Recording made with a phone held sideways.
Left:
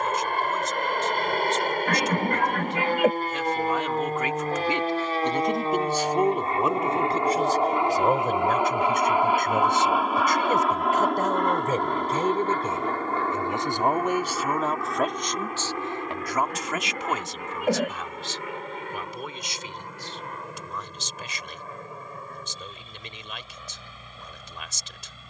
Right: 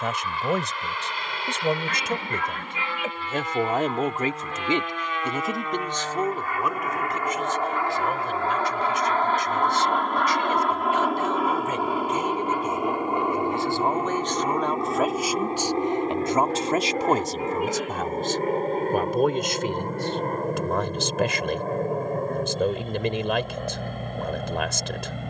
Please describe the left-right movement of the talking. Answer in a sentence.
You can hear the talking go left and come back.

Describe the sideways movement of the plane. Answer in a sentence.
You can hear the plane move from left to right.